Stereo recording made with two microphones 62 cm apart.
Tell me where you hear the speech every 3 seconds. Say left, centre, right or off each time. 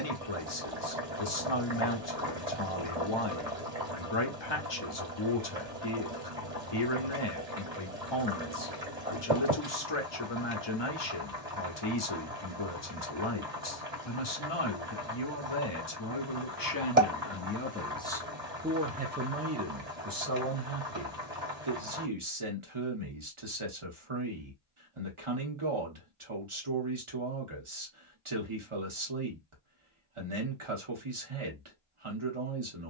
left, left, left, left, left, left, right, right, right, right, right.